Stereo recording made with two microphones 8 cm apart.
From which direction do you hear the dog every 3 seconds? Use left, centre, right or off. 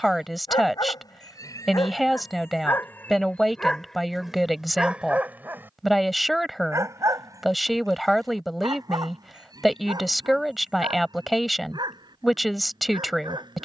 left, centre, right, right, right.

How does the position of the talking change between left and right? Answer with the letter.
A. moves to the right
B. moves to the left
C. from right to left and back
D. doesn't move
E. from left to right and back
D.